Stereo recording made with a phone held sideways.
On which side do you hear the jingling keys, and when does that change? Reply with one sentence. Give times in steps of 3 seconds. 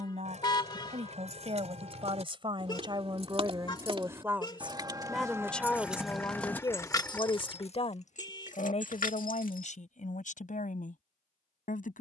You can hear the jingling keys on the right from 0 s and on the left from 6 s.